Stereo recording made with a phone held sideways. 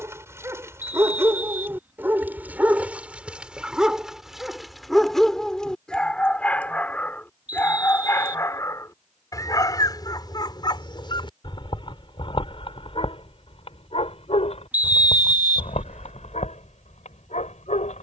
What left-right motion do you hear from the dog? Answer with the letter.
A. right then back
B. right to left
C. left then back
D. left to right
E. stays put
B.